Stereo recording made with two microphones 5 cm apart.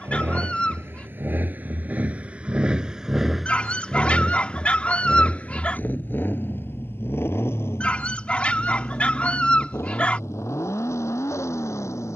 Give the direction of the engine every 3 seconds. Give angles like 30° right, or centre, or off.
40° right, 10° left, 50° left, 70° left.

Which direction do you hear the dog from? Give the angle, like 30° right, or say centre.
30° left.